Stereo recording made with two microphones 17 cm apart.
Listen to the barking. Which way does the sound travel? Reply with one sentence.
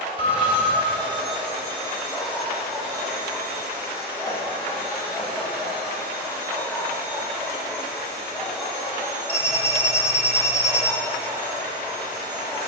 In this clip you hear the barking stay in one place.